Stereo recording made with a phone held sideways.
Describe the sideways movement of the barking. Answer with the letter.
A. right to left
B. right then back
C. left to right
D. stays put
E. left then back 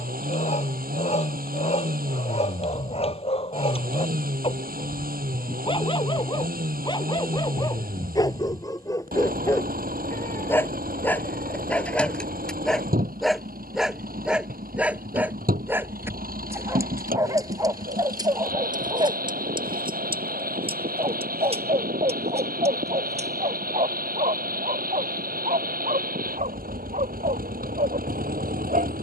C.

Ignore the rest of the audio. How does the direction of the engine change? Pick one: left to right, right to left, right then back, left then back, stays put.
stays put.